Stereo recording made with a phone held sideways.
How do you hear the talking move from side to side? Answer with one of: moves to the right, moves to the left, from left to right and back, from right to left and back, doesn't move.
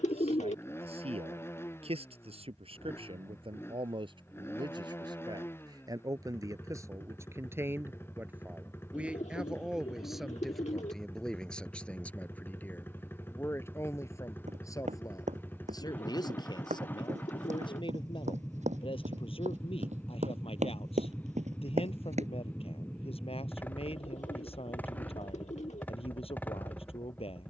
moves to the left.